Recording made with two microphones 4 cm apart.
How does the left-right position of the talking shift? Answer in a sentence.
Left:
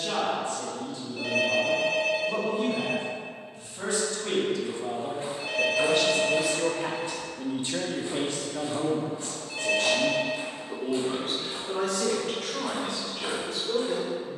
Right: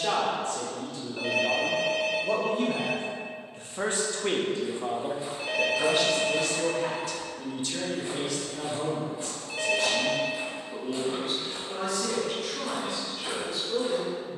In this clip you hear the talking travel towards the left.